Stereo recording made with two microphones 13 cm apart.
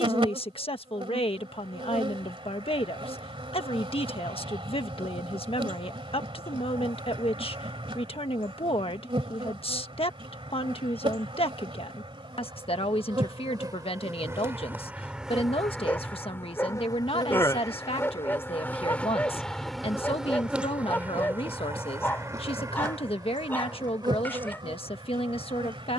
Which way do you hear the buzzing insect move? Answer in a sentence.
In this clip you hear the buzzing insect move from right to left and back again.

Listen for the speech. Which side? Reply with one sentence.
In this clip you hear the speech on the left.